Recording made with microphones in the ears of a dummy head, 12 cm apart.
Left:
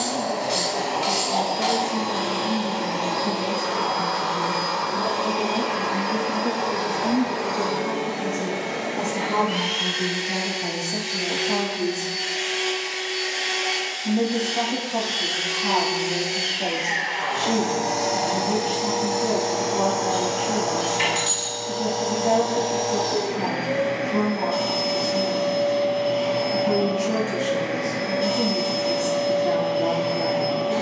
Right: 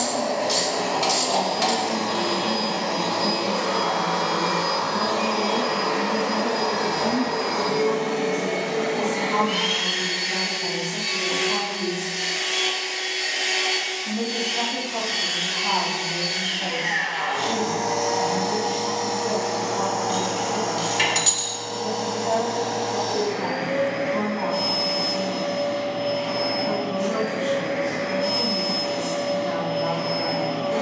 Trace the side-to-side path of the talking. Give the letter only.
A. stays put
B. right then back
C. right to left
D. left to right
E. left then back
C.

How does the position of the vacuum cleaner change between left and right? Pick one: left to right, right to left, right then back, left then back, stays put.
right to left.